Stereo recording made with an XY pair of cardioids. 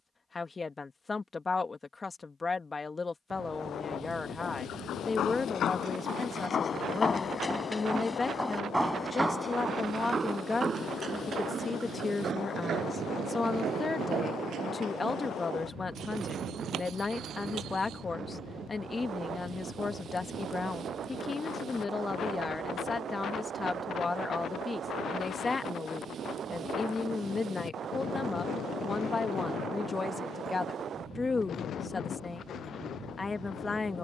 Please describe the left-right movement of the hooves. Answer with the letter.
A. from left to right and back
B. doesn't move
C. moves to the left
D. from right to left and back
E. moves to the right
E.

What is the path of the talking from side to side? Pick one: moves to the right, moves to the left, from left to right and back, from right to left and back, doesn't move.
doesn't move.